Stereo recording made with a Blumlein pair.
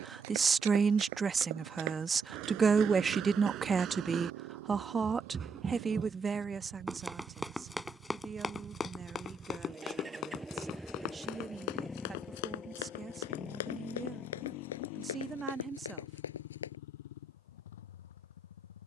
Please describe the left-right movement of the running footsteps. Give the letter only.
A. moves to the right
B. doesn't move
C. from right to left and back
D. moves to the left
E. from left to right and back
D.